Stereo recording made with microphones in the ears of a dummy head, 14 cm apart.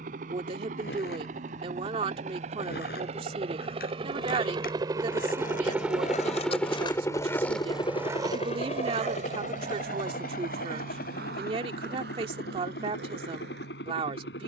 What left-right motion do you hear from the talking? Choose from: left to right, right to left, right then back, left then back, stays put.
stays put.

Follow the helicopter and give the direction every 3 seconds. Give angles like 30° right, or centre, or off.
60° right, 30° right, 20° left, 60° left, 70° left.